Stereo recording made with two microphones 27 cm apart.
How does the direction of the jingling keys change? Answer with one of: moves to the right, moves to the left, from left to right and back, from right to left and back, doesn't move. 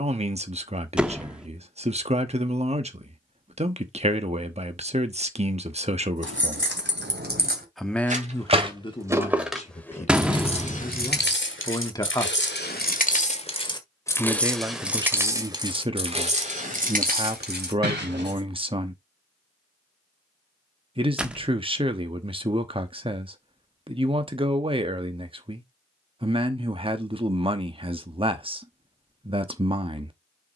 from right to left and back.